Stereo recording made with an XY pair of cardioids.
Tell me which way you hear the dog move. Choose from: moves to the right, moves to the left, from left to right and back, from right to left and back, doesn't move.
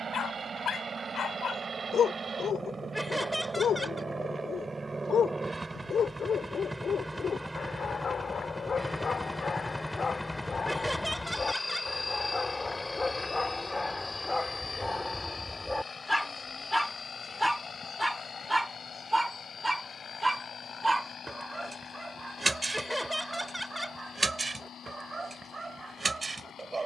moves to the right.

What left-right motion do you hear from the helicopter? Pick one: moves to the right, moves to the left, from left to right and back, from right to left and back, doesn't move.
moves to the left.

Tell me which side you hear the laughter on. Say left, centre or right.
centre.